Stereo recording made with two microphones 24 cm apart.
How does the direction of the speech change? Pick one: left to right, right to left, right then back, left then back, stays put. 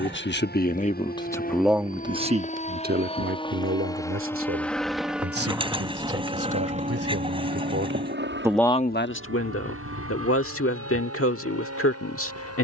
right then back.